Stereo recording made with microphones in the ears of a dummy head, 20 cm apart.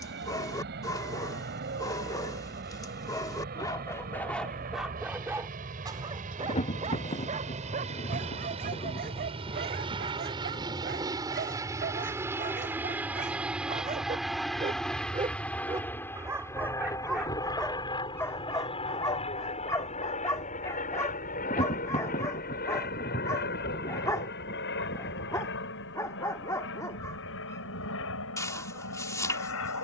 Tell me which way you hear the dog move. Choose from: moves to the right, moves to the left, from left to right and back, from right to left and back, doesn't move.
from left to right and back.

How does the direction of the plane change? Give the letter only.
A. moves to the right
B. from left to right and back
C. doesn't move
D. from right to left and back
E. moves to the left
E.